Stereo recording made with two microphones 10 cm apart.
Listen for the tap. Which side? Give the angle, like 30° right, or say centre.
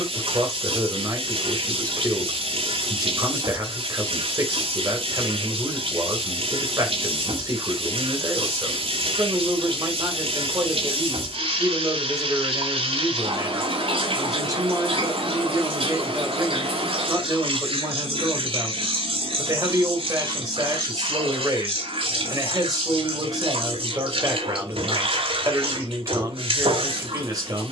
70° right.